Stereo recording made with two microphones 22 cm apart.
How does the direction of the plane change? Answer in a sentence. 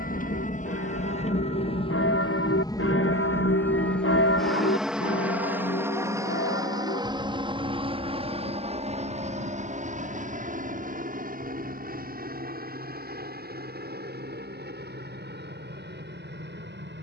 You can hear the plane move from left to right.